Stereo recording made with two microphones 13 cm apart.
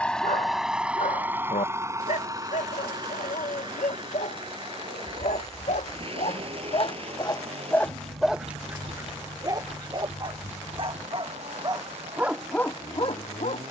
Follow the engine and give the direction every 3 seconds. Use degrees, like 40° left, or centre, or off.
20° right, 40° right, 50° right, 50° right, 60° right.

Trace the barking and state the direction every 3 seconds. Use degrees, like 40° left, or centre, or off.
80° left, 70° left, 20° left, 40° right, 30° left.